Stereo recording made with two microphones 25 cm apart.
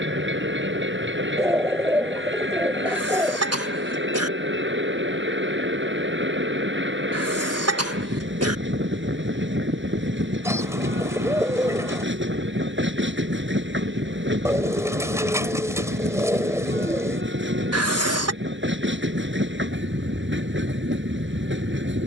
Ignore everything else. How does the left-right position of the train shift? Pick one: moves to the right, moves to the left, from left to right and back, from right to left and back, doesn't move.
doesn't move.